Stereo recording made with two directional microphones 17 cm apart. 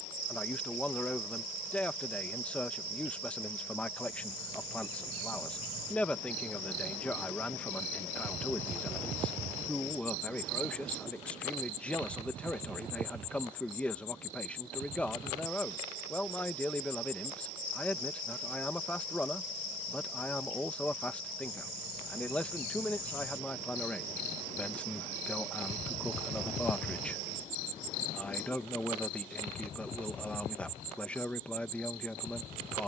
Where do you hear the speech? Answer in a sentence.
In this clip you hear the speech in the centre.